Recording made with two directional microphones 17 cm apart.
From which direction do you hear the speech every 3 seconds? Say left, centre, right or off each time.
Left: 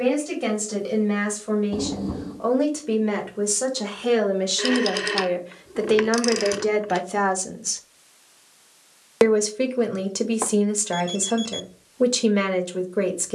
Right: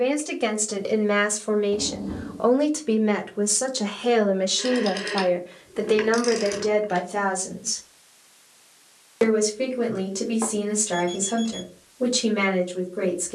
right, centre, left, left, left.